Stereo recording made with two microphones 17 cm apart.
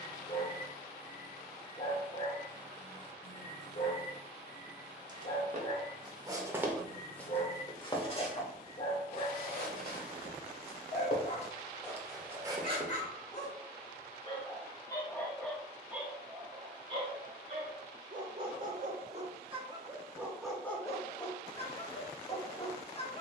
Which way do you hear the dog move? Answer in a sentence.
You can hear the dog go right and come back.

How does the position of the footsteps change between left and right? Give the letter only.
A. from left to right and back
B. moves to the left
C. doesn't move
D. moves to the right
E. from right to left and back
E.